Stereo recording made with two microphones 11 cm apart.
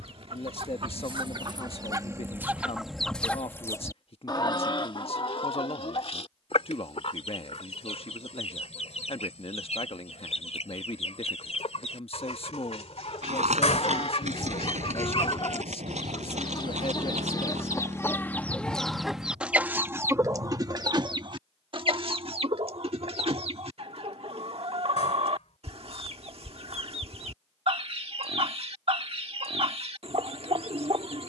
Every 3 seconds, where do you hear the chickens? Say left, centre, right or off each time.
right, left, left, left, left, left, centre, right, right, right, right.